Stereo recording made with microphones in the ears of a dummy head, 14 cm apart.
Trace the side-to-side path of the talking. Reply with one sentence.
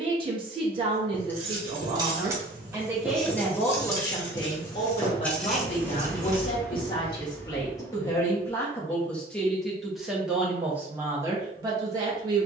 You can hear the talking go left and come back.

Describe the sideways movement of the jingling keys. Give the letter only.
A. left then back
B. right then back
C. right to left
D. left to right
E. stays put
A.